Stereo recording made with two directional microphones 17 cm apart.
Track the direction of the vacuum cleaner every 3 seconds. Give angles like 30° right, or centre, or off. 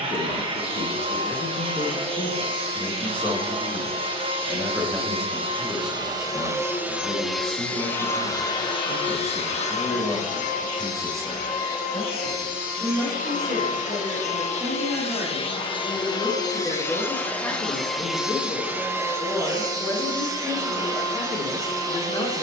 30° right, 30° right, centre, 50° left, 50° left, 20° left, 20° right, 20° right.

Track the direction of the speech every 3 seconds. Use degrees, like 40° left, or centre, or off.
20° left, centre, 10° right, 20° right, 20° right, centre, 20° left, 20° left.